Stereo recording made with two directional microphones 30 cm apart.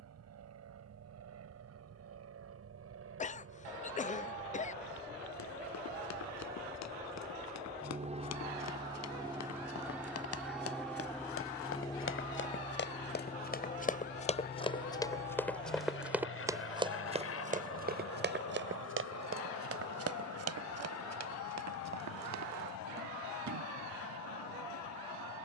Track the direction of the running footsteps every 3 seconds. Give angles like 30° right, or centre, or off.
off, 70° left, 60° left, 50° left, 30° left, 10° right, 50° right, 60° right, off.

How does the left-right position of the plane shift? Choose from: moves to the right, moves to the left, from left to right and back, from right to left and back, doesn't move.
moves to the left.